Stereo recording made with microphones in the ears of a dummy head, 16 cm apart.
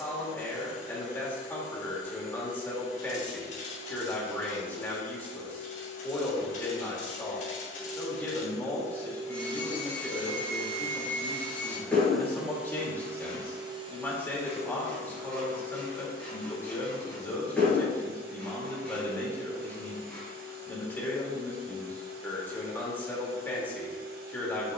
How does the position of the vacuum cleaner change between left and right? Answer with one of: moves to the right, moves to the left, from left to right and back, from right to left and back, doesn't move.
moves to the right.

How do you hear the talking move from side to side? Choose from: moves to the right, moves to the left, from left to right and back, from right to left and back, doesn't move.
doesn't move.